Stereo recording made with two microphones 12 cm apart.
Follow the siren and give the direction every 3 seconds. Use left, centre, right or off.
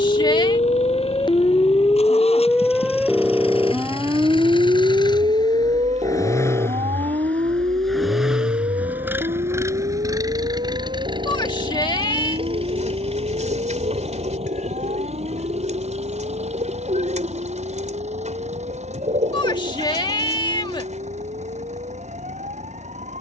left, right, right, right, right, right, right, right.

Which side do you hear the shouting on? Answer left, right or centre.
left.